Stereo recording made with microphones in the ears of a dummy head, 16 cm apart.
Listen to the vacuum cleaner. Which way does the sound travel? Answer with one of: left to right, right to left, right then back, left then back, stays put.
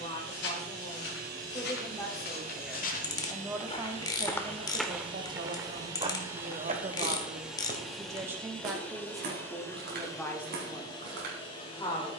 right to left.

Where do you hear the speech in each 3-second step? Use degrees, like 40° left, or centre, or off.
20° left, 30° right, 30° right, 10° left.